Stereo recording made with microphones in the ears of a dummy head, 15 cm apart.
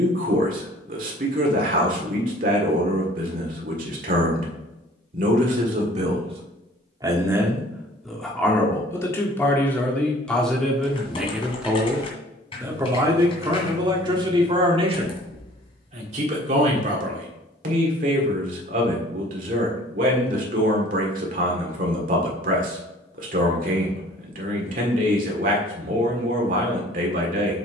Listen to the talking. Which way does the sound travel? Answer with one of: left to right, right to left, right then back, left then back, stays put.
left then back.